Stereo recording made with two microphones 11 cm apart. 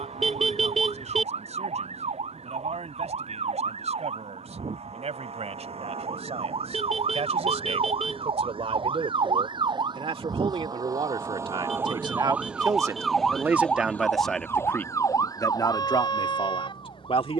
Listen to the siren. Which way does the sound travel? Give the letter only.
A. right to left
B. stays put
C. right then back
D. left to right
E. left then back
A.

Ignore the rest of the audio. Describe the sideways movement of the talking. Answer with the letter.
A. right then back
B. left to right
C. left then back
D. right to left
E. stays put
D.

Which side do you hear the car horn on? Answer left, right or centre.
centre.